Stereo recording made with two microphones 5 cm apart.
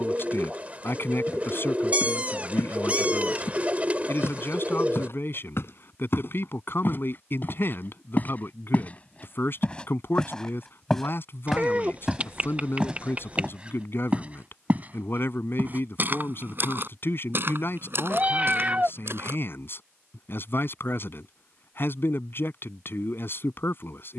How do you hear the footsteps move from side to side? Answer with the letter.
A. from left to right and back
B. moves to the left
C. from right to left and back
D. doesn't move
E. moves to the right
E.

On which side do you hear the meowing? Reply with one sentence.
You can hear the meowing on the right.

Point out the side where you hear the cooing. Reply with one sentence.
In this clip you hear the cooing on the right.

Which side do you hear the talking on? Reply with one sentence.
In this clip you hear the talking on the left.